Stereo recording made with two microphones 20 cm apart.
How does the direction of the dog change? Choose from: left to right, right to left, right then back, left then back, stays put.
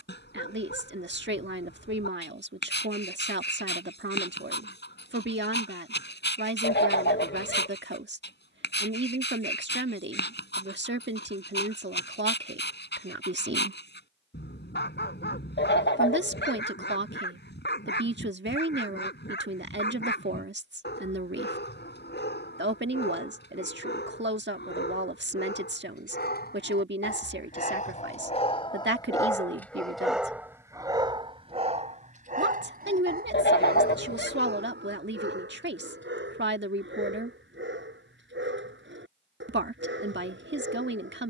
left to right.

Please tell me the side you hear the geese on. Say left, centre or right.
left.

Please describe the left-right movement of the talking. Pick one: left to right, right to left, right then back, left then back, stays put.
stays put.